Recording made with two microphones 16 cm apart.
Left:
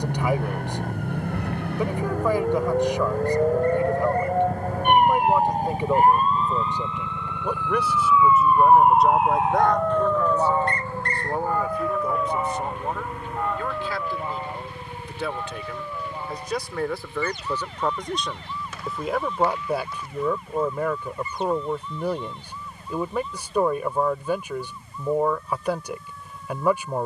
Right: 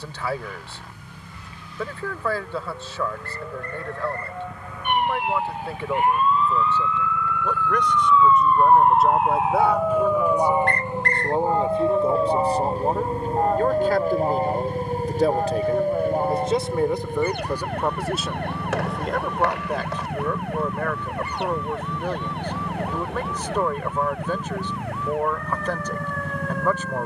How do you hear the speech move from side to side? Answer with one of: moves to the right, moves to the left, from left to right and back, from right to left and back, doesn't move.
from left to right and back.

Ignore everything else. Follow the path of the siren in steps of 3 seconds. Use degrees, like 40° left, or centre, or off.
70° left, 50° left, 20° left, 10° right, 40° right, 50° right, 60° right, 60° right, 70° right.